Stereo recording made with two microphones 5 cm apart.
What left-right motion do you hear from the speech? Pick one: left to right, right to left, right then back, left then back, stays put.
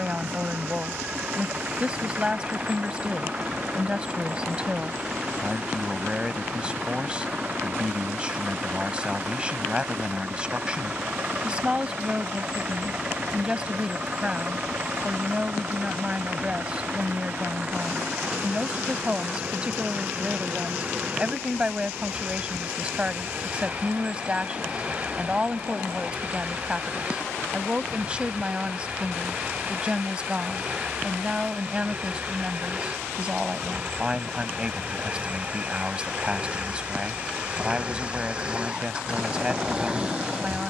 stays put.